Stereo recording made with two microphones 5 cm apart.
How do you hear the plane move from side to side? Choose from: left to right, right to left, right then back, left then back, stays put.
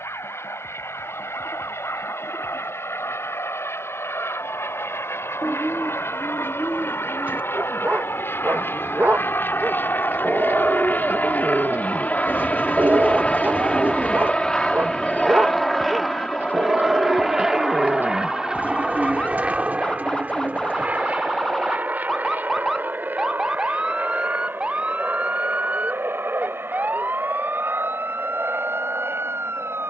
left to right.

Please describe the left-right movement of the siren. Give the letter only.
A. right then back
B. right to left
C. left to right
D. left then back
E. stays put
C.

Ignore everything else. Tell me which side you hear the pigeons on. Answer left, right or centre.
right.